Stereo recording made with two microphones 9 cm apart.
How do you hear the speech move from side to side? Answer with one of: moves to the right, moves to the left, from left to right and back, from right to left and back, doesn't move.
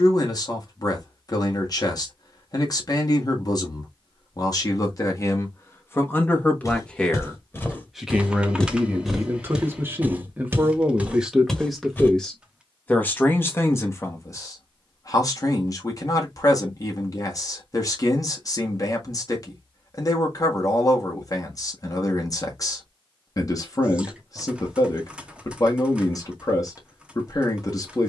from left to right and back.